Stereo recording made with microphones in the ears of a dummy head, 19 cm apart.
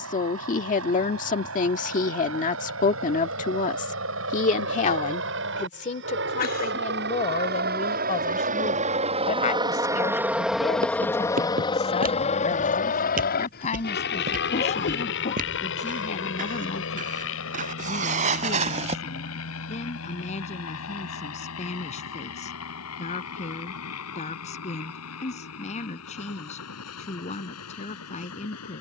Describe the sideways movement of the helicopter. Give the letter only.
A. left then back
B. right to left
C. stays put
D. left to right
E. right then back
B.